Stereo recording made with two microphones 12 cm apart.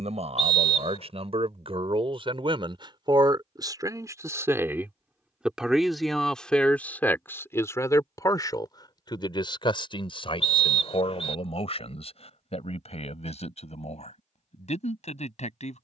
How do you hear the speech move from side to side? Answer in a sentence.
You can hear the speech move to the left.